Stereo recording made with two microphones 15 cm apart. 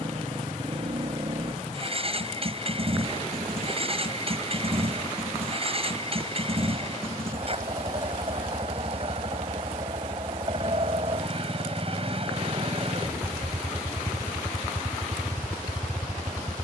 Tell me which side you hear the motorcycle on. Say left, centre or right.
right.